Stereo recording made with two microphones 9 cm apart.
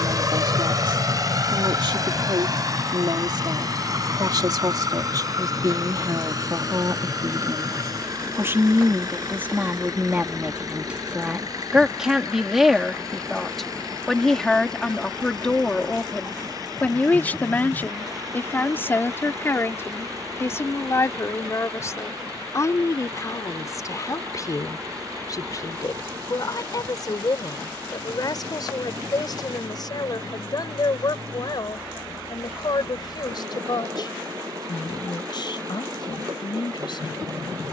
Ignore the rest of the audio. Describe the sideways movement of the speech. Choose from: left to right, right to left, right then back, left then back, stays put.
right to left.